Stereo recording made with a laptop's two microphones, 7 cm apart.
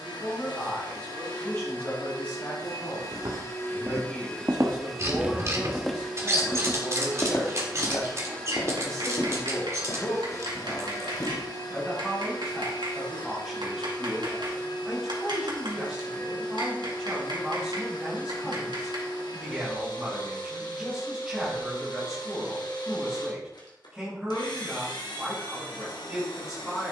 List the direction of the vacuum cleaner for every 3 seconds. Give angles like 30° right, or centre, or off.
80° left, 20° left, 10° left, 50° left, 80° left, 80° left, 80° left, 80° left, 80° left.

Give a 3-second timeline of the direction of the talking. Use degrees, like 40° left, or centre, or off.
30° left, 20° left, 20° left, 10° left, centre, 10° right, 10° right, 10° right, 10° right.